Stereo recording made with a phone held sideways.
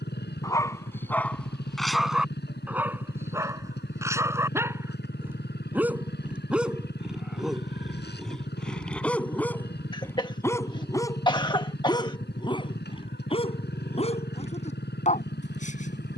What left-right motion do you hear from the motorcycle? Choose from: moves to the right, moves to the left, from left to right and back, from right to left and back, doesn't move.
doesn't move.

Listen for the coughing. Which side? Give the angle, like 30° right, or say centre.
30° left.